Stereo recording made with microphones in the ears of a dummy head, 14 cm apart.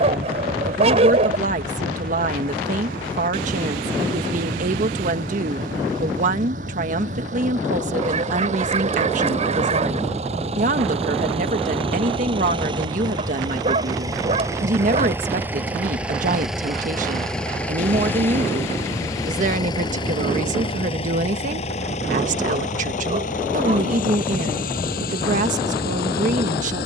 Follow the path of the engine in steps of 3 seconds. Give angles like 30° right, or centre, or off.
60° right, 50° right, 50° right, 40° right, 30° right, centre, 20° left, 50° left, 60° left.